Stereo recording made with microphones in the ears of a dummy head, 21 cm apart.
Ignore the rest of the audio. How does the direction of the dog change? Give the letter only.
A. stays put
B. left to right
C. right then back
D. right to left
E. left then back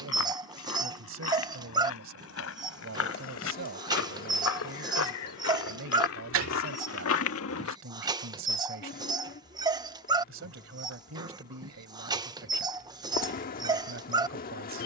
A.